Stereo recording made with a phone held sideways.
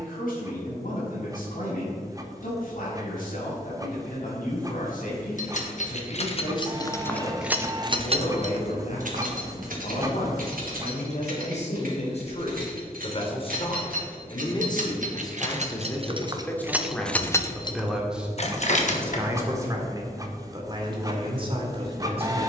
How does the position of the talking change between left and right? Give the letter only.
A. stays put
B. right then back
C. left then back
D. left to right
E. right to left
D.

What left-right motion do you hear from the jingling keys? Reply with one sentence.
You can hear the jingling keys move from left to right and back again.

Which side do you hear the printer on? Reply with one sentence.
You can hear the printer on the right.